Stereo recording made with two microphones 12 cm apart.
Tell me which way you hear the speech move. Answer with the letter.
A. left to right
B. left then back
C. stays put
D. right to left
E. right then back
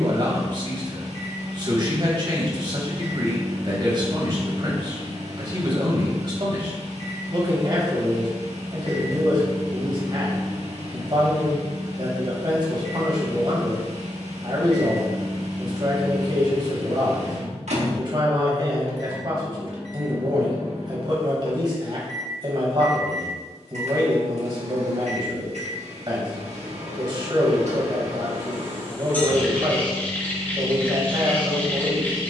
C.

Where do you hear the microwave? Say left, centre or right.
right.